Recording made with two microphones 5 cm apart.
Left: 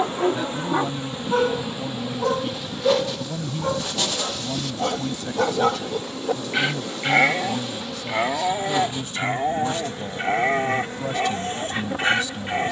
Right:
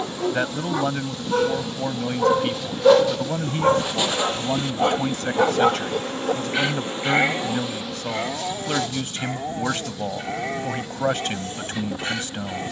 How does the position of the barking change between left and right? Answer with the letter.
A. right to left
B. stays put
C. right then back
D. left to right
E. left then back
C.